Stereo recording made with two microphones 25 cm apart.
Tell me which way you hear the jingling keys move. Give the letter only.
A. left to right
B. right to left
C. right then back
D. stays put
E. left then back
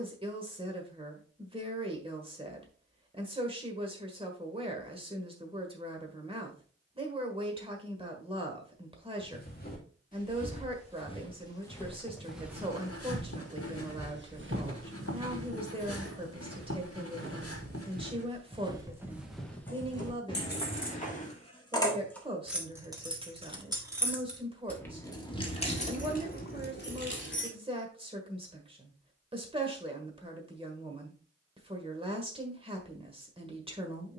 C.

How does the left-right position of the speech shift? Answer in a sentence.
You can hear the speech stay put.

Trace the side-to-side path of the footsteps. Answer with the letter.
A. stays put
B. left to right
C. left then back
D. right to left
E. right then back
E.